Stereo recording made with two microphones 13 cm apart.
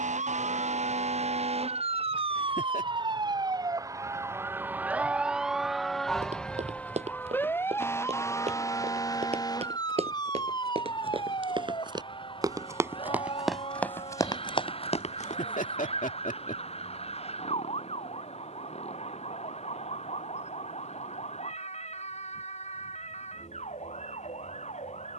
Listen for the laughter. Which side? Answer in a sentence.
You can hear the laughter on the left.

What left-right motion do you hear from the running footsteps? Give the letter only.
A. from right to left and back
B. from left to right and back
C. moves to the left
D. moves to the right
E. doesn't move
C.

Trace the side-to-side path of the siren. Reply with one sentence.
You can hear the siren move from right to left.